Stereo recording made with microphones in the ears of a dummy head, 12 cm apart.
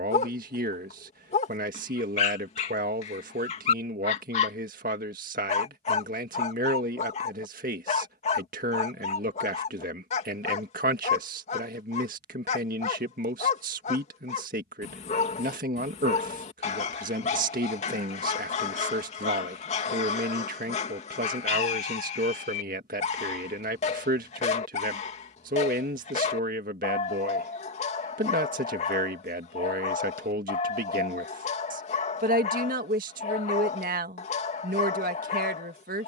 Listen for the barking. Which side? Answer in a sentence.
In this clip you hear the barking on the left.